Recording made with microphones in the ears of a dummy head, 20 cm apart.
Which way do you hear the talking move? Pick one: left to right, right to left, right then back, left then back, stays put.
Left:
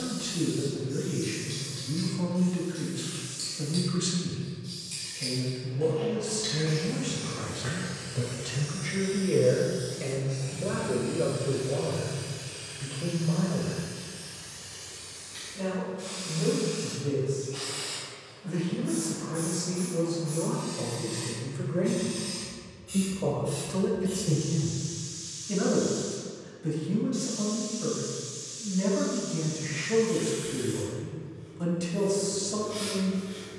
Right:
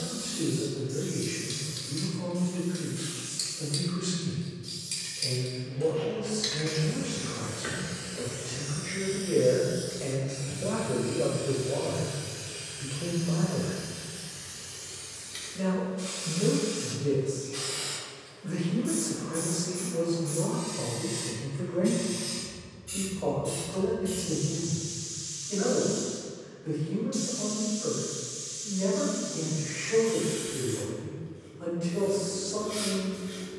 right then back.